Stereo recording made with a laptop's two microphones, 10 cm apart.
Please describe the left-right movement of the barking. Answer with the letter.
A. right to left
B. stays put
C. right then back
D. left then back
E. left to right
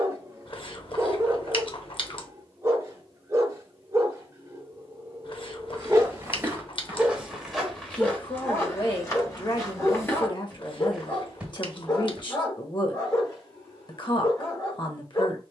A.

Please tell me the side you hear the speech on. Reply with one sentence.
You can hear the speech on the left.